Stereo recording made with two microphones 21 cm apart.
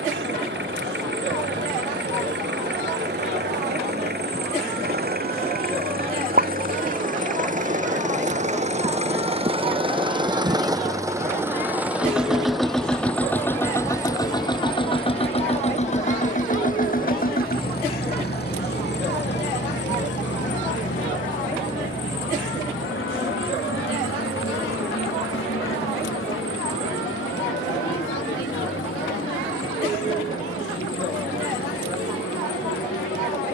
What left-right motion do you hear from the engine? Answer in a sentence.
In this clip you hear the engine travel towards the left.